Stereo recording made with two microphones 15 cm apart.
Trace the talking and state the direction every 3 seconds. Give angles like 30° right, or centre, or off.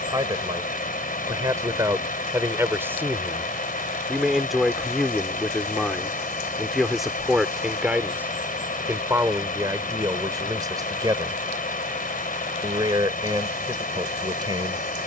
20° right, centre, 10° right, 20° right, 30° right.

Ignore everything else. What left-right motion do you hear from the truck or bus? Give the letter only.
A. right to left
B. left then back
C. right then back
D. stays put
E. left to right
D.